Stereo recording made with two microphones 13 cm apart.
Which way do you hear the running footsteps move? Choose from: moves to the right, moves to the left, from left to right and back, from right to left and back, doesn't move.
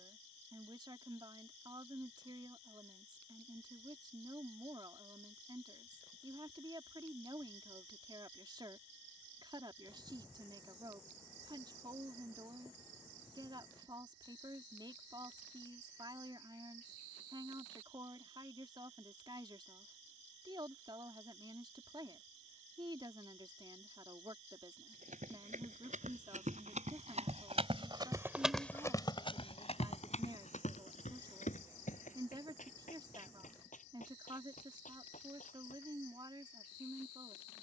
moves to the left.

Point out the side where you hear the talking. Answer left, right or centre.
right.